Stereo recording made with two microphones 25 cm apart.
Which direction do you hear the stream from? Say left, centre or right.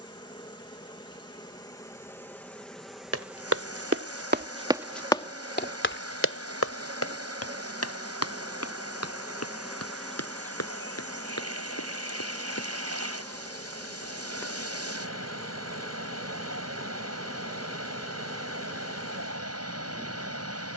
right.